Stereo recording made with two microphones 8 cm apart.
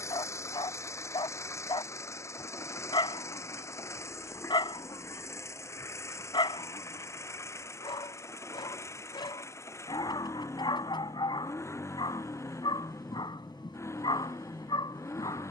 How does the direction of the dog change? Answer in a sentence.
In this clip you hear the dog stay put.